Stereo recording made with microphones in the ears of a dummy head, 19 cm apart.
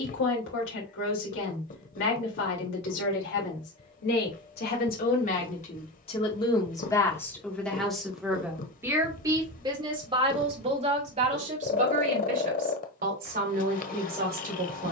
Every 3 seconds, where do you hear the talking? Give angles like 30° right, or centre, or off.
60° left, 50° left, 10° left, 30° right, 40° right.